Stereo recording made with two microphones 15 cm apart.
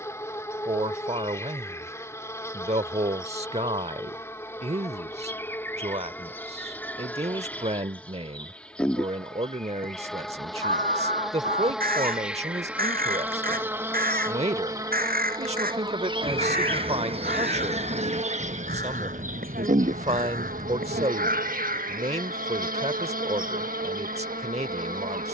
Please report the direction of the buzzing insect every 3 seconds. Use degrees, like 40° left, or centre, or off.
20° left, 20° left, 10° left, centre, 10° right, 40° right, 60° right, 70° right, 70° right.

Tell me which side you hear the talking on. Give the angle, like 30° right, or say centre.
50° right.